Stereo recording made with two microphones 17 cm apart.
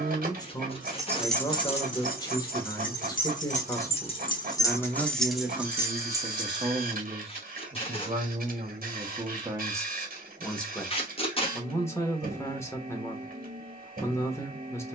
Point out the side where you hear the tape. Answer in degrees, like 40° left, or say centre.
30° left.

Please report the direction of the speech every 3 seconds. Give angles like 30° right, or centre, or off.
20° left, 10° left, 30° right, centre, 20° left.